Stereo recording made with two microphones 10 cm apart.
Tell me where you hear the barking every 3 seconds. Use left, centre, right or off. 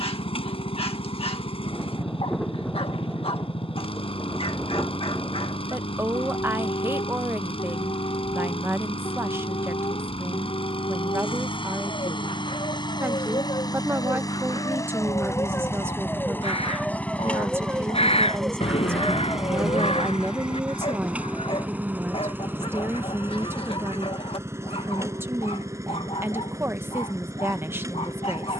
left, left, left, left, left, centre, left, left, left, left.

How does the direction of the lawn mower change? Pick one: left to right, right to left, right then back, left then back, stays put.
left to right.